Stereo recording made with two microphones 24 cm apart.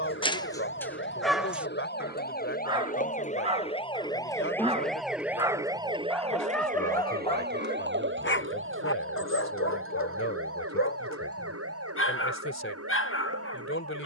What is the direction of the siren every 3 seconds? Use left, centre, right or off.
left, centre, right, right, right.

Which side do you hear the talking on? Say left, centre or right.
left.